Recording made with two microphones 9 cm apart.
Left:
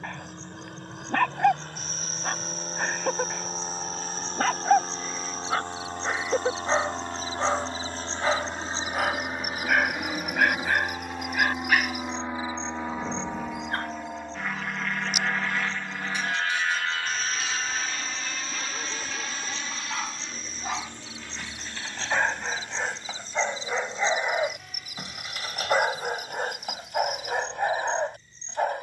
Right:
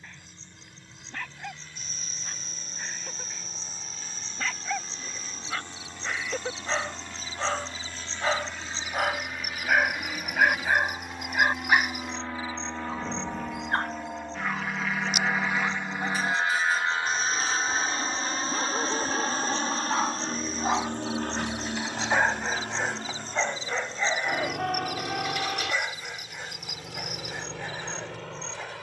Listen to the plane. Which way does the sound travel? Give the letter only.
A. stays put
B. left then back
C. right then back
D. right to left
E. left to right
E.